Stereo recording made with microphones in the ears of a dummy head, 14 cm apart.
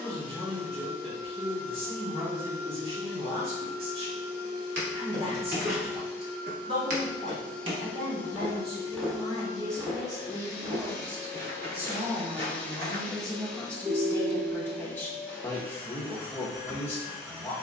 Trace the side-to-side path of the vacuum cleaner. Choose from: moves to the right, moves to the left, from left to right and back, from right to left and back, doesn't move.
from right to left and back.